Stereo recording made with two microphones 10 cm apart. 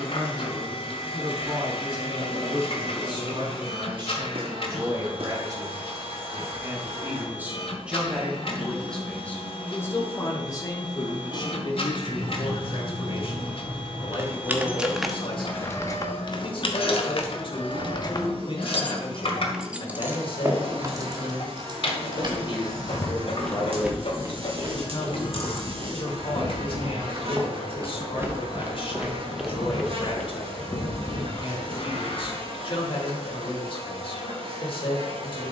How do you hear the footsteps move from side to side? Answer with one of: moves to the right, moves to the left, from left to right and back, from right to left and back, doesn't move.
from left to right and back.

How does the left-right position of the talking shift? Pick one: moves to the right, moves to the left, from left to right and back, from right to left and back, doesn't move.
moves to the left.